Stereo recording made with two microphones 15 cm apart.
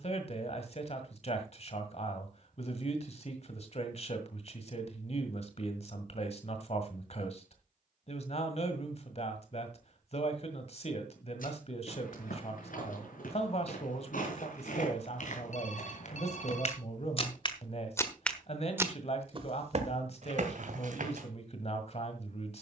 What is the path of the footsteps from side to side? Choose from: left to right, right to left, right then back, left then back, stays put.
left to right.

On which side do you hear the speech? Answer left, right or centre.
left.